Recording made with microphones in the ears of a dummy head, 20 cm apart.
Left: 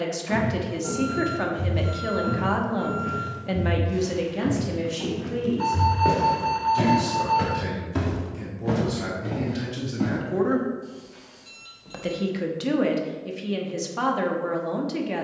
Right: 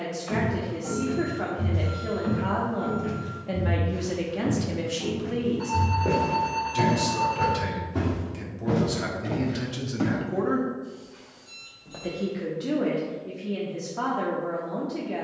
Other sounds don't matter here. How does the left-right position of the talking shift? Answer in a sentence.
You can hear the talking go right and come back.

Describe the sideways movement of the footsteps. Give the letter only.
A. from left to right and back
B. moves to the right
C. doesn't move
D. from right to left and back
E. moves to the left
D.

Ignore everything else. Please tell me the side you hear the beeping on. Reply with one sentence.
In this clip you hear the beeping on the left.